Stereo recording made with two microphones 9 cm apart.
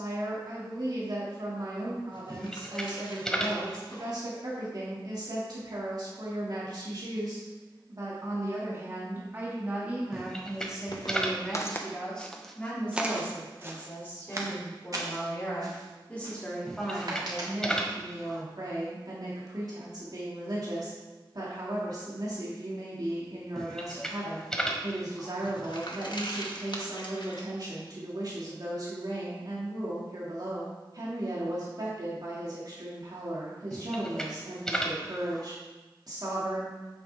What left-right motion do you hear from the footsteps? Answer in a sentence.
In this clip you hear the footsteps move from left to right.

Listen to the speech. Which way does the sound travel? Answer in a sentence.
You can hear the speech move from right to left and back again.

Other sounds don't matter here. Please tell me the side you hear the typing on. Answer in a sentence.
In this clip you hear the typing in the centre.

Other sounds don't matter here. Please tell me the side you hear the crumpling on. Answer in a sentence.
In this clip you hear the crumpling on the left.